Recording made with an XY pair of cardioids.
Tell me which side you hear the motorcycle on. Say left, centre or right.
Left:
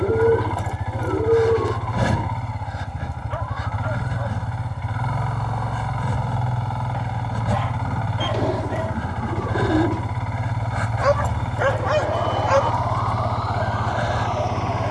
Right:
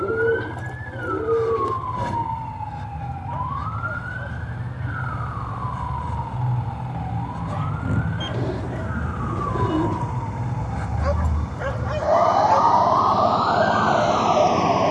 left.